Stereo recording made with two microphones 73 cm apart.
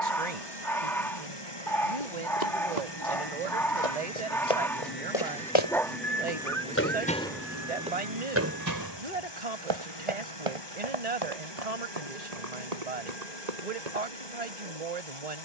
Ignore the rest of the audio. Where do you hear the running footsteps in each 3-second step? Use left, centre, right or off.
left, left, centre, right, right.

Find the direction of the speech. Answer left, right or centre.
right.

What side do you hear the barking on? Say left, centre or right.
centre.